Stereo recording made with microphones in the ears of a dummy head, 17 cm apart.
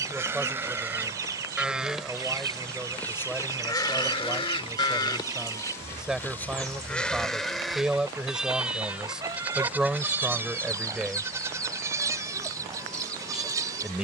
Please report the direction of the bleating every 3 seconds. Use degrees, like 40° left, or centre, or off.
10° right, 20° left, centre, 10° right, 20° right.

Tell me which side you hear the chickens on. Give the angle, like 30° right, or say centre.
20° right.